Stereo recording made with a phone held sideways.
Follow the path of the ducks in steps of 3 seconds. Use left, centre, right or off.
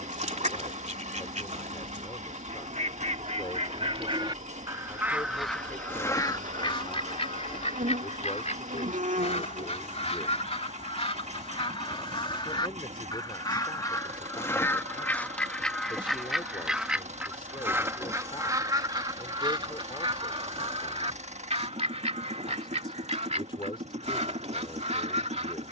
right, right, left, left, left, centre, right, right, right.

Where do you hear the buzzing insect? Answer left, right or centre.
right.